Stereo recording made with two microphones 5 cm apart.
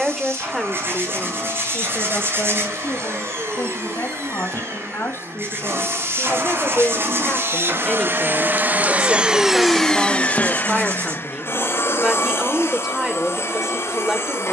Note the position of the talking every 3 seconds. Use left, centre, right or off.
left, left, left, centre, centre.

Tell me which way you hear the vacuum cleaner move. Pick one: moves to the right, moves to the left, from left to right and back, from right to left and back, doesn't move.
moves to the left.